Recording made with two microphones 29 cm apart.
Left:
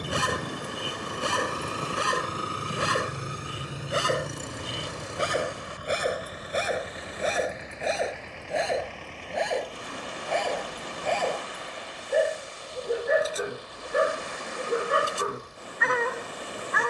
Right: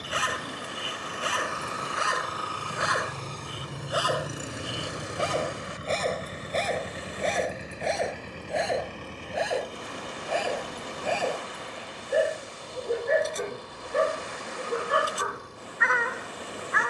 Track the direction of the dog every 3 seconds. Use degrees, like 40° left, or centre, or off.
50° left, 20° left, 10° left, 10° right, 10° left, 40° left.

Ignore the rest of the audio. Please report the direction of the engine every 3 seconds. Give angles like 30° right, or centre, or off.
40° left, 10° right, 40° right, 50° right, 60° right, 60° right.